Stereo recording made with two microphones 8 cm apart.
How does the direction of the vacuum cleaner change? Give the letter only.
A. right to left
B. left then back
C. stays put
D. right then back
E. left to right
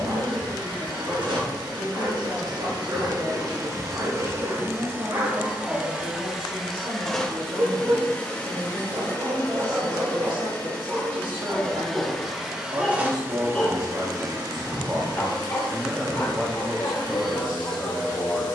B.